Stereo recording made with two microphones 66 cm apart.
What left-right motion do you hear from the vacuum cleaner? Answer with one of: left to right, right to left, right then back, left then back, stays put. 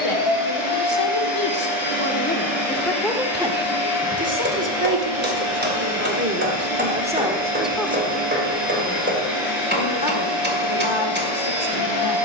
stays put.